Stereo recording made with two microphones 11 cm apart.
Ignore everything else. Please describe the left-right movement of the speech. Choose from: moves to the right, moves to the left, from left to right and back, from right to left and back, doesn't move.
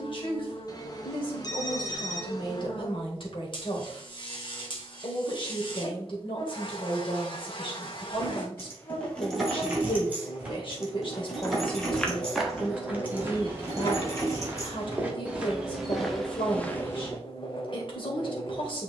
doesn't move.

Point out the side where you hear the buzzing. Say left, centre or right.
left.